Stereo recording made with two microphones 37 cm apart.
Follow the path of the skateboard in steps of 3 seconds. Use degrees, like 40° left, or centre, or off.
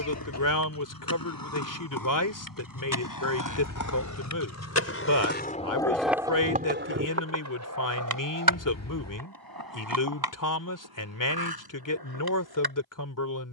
70° left, 40° left, 40° right, 80° right, 80° right.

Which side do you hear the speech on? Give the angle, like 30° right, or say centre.
60° left.